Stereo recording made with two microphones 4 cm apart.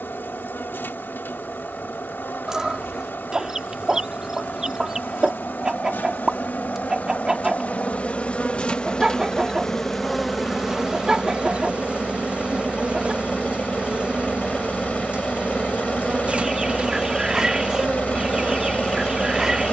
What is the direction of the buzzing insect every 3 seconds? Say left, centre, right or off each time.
left, left, left, centre, right, right, right.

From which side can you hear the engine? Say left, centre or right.
left.